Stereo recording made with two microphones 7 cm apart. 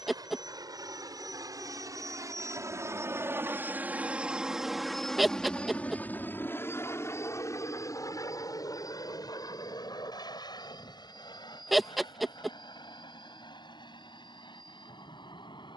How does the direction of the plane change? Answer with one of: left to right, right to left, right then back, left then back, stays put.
right to left.